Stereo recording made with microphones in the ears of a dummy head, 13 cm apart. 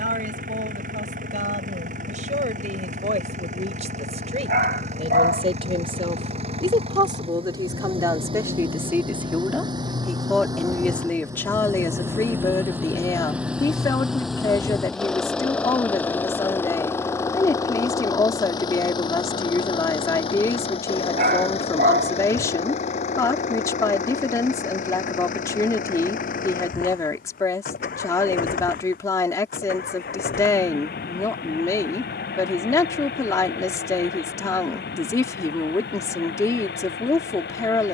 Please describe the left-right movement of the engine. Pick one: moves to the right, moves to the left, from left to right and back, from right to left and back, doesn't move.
moves to the left.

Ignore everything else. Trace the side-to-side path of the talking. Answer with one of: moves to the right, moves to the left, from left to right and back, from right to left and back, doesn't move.
moves to the left.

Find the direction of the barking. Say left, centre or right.
right.